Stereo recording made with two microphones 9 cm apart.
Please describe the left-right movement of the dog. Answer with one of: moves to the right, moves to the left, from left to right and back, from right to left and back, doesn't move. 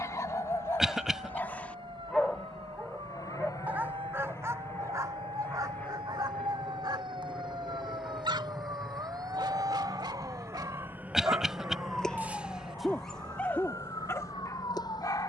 from left to right and back.